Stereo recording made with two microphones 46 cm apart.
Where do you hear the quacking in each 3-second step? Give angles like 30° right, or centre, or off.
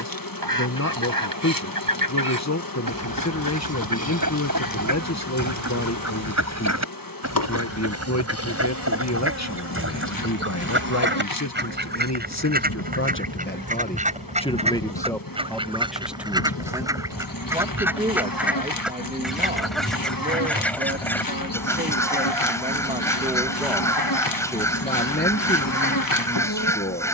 50° right, 40° right, 30° right, 30° right, 20° right, 10° right, centre, 10° left, 10° left.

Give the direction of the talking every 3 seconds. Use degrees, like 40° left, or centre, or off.
40° left, 40° left, 40° left, 40° left, 20° left, centre, 20° right, 20° right, 20° left.